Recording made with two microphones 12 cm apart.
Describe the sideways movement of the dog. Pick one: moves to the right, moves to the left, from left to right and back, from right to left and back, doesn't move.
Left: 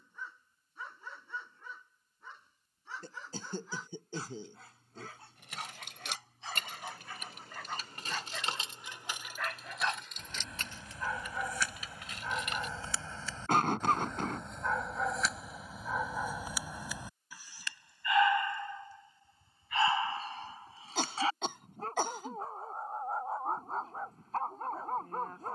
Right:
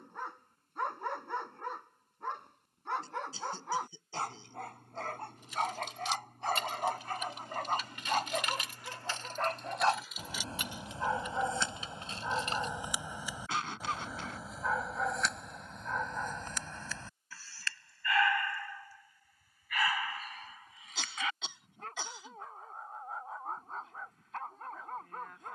moves to the left.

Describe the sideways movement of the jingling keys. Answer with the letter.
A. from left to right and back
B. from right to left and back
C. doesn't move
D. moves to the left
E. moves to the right
E.